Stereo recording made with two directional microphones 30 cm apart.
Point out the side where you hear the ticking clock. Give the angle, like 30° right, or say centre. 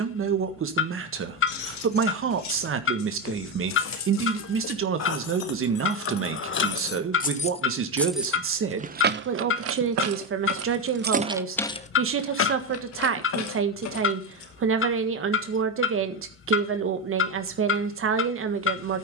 40° left.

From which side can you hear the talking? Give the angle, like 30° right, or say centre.
40° right.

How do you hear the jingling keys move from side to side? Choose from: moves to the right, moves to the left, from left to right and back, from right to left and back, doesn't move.
from left to right and back.